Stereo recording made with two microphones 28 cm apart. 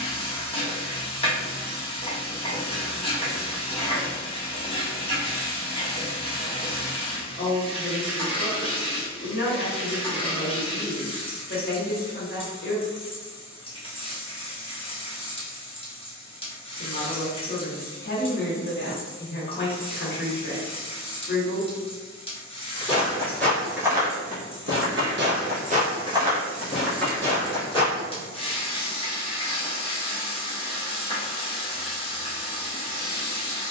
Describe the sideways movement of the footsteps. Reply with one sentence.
You can hear the footsteps go right and come back.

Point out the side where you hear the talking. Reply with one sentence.
You can hear the talking on the left.